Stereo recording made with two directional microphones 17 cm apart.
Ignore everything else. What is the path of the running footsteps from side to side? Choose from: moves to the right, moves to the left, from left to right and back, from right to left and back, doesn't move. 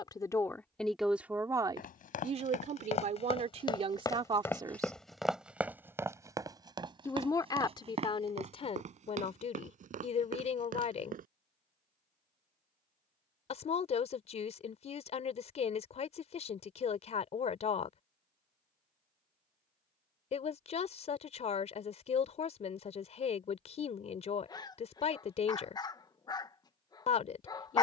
moves to the right.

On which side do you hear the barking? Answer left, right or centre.
left.